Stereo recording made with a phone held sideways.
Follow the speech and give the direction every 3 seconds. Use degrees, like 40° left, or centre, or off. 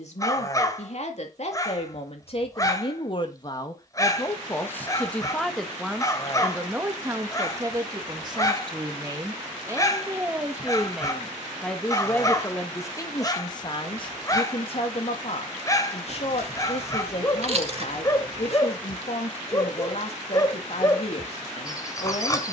50° left, 20° left, 20° right, 10° right, 30° left, 50° left, 50° left, 50° left.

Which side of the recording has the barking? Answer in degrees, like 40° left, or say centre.
20° left.